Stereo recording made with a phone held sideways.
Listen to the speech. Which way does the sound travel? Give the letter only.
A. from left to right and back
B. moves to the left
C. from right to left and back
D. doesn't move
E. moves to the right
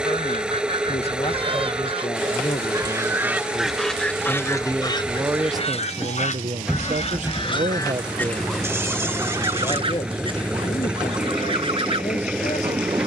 A.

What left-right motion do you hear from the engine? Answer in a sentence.
You can hear the engine stay in one place.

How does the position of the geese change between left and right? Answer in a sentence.
You can hear the geese go left and come back.